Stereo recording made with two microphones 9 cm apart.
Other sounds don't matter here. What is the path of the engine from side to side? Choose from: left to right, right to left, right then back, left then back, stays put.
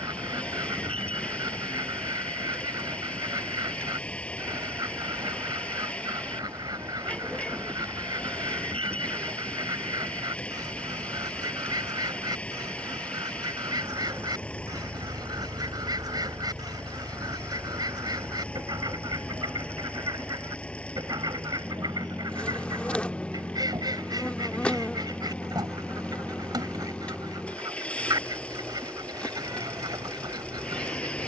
stays put.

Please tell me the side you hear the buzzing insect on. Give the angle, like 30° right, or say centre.
10° left.